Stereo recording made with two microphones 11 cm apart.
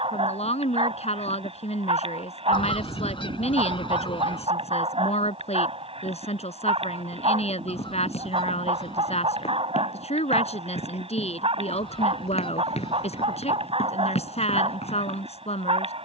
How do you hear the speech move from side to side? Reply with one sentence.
In this clip you hear the speech stay in one place.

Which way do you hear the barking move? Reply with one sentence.
You can hear the barking stay put.